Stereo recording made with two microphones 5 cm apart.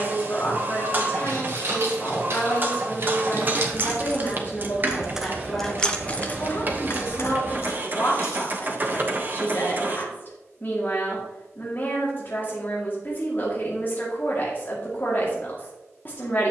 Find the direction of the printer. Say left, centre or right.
right.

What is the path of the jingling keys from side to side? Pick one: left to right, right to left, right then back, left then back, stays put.
right to left.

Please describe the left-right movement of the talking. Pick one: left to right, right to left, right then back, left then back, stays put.
stays put.